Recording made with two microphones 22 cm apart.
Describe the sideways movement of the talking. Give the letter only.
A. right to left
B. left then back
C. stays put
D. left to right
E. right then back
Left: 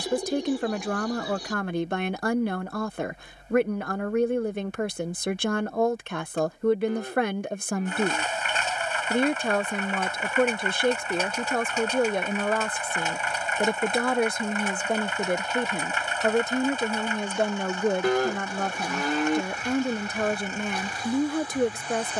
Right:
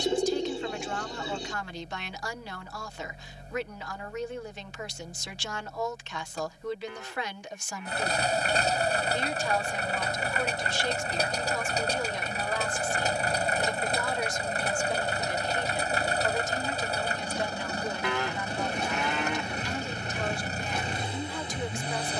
C.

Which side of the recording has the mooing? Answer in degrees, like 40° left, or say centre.
40° left.